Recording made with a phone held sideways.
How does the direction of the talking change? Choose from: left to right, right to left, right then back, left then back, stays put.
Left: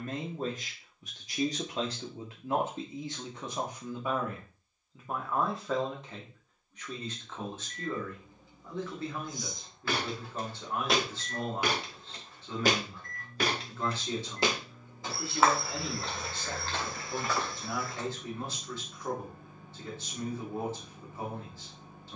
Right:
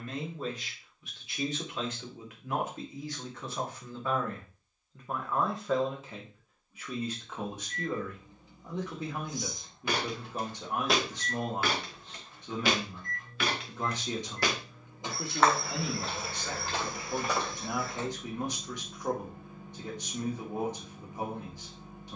left to right.